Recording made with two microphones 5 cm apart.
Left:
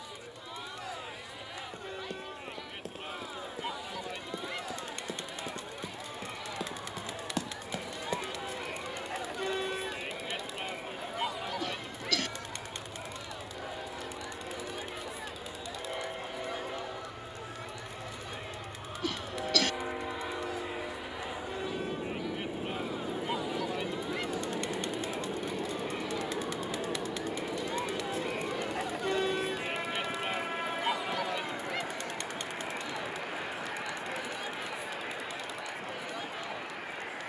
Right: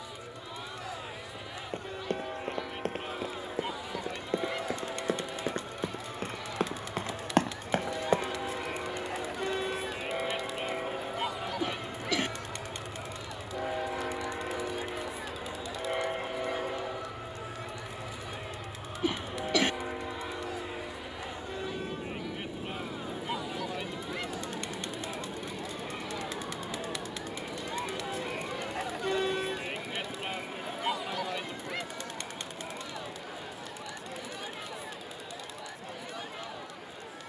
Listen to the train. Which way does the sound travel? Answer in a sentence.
In this clip you hear the train go from the right side to the left.